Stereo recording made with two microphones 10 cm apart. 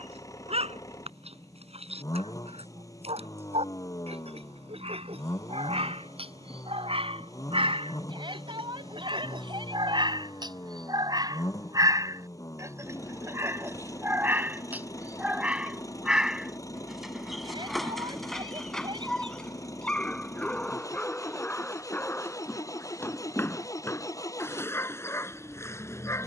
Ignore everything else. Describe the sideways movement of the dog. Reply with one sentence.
In this clip you hear the dog move to the left.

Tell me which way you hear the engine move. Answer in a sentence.
In this clip you hear the engine stay put.